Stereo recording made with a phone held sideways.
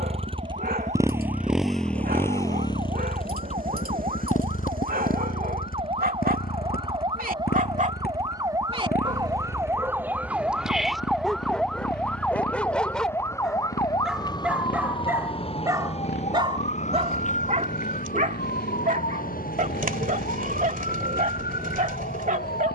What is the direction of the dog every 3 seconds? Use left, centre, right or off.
right, right, right, centre, centre, right, right, right.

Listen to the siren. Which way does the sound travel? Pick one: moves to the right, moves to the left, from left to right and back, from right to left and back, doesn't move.
moves to the left.